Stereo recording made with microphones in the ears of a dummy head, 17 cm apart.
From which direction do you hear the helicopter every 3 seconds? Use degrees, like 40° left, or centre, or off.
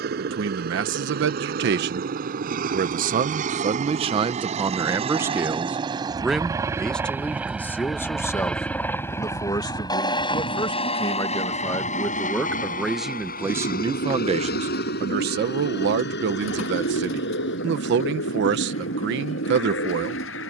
60° right, 40° right, 10° right, 30° left, 50° left, 60° left, 70° left.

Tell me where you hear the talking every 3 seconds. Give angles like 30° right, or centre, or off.
60° right, 30° right, 10° left, 20° left, 10° right, 60° right, 60° right.